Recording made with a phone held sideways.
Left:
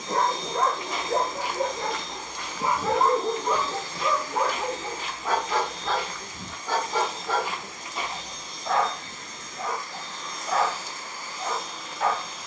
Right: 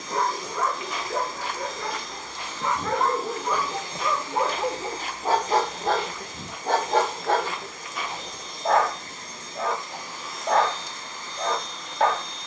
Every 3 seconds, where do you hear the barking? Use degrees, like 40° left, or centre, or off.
30° left, 10° right, 60° right, 60° right.